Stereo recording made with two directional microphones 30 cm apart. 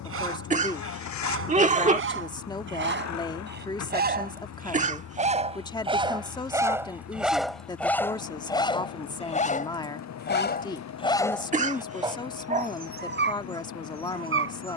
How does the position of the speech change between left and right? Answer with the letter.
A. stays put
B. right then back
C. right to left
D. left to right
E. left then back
A.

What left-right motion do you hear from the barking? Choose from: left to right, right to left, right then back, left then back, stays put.
left then back.